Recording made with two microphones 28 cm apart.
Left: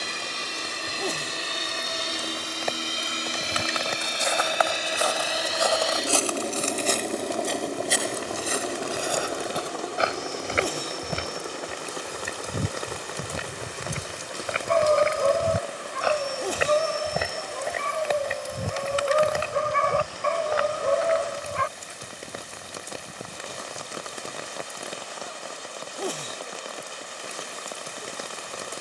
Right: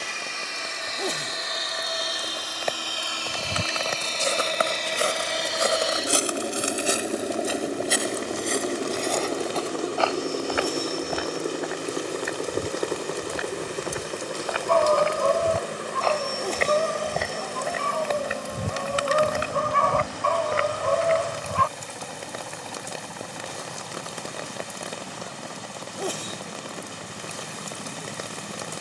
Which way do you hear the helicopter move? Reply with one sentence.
In this clip you hear the helicopter move from left to right.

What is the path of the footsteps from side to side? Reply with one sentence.
In this clip you hear the footsteps go left and come back.